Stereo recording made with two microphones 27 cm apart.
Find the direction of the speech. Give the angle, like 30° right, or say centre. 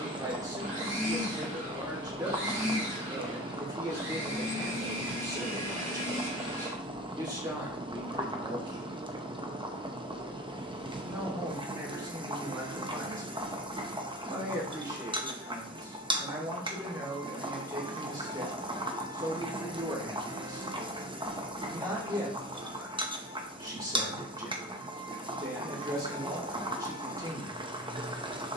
10° right.